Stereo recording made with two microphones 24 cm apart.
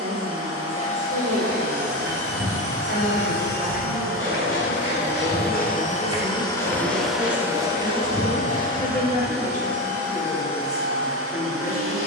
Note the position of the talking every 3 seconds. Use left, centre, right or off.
right, right, centre, left.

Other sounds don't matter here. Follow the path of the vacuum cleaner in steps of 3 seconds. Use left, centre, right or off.
left, left, centre, right.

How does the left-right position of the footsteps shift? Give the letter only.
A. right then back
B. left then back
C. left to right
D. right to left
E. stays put
D.